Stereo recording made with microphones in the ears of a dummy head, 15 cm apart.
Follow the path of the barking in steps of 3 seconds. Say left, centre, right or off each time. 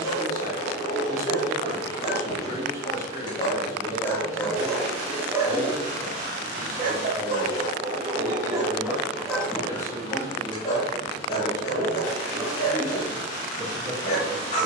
left, centre, right, left, left.